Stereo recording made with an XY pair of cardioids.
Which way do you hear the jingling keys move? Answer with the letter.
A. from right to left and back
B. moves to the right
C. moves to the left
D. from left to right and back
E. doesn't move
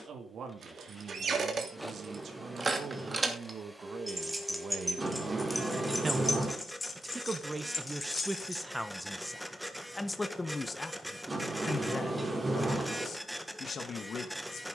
C.